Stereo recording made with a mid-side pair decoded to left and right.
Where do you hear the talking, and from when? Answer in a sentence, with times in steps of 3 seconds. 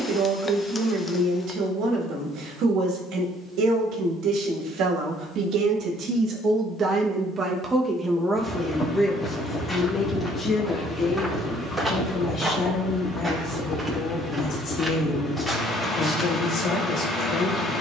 In this clip you hear the talking on the right from 0 s and on the left from 9 s.